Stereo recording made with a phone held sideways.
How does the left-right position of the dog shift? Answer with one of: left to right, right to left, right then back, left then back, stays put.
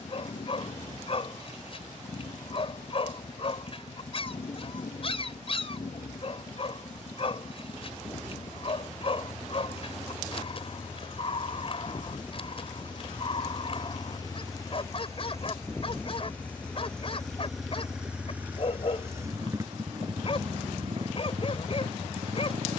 stays put.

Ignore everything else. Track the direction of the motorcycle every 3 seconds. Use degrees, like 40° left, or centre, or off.
60° left, 50° left, 50° left, 40° left, 30° left, 10° left, 20° right, 50° right.